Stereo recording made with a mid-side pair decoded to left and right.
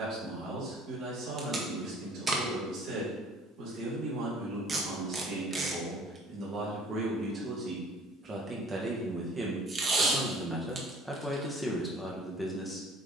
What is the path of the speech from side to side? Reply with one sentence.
You can hear the speech go from the right side to the left.